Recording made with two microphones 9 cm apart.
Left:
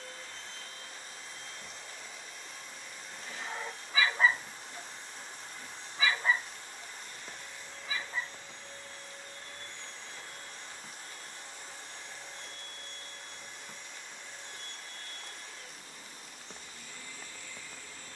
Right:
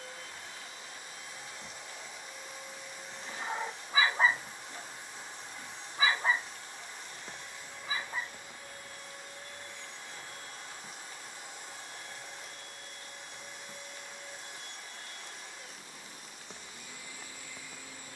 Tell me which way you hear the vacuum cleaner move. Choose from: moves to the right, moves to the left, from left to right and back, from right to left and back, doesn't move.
doesn't move.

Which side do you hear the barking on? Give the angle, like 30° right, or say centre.
30° right.